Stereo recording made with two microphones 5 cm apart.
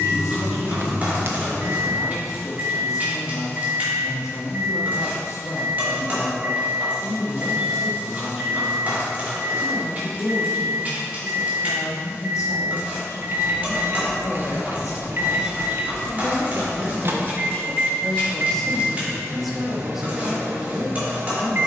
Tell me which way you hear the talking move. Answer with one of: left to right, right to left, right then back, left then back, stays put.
left to right.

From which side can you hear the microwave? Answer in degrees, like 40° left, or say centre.
50° right.